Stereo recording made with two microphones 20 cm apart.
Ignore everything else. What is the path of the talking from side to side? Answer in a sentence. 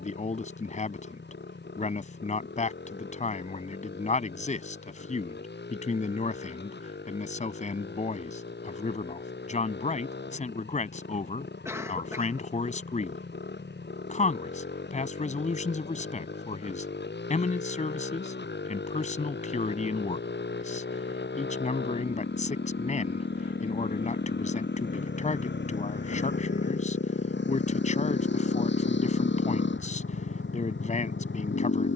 In this clip you hear the talking stay in one place.